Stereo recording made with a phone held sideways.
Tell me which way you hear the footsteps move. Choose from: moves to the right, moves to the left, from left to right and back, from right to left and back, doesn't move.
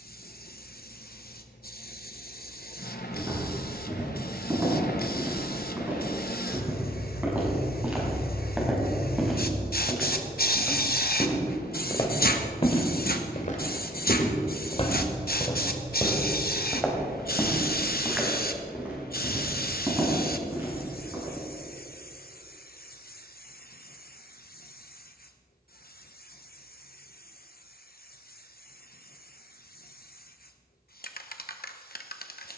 from right to left and back.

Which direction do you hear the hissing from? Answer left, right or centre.
left.